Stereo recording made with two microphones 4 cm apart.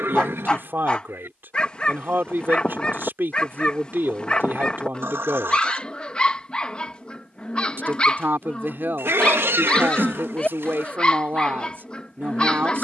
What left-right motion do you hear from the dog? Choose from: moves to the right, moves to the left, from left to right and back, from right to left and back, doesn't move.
doesn't move.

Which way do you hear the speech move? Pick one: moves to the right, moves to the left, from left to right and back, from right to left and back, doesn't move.
doesn't move.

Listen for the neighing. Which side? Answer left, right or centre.
right.